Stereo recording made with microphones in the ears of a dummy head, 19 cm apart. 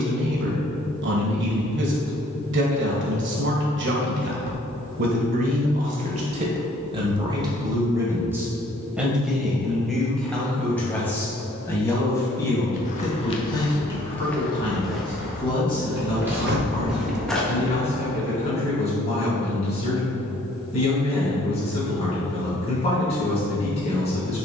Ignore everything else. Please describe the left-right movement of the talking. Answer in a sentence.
You can hear the talking move from right to left.